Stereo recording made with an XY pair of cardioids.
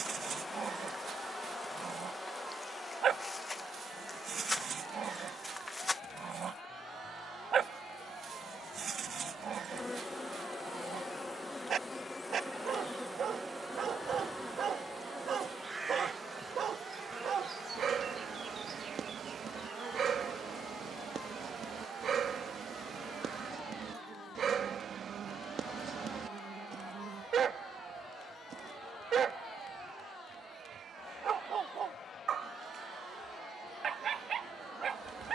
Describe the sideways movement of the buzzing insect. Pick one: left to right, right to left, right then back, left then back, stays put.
left to right.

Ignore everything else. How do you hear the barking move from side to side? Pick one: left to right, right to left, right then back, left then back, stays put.
stays put.